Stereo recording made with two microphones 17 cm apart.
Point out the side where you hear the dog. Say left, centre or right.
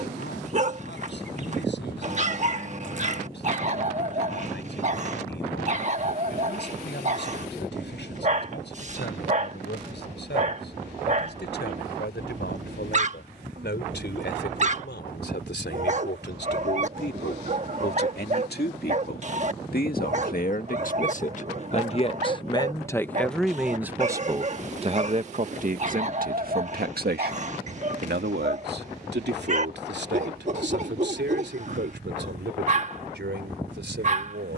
right.